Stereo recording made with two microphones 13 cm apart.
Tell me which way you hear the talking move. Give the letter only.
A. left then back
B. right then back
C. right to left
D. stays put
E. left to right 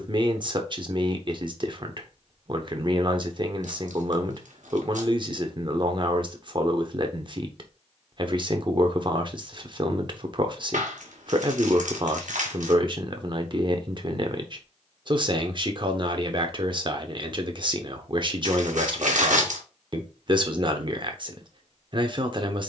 D.